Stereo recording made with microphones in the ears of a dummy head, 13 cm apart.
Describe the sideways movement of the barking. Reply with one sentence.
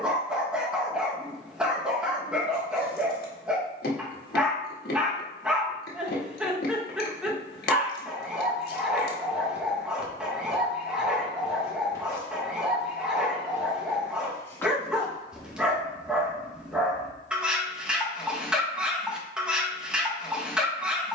In this clip you hear the barking stay put.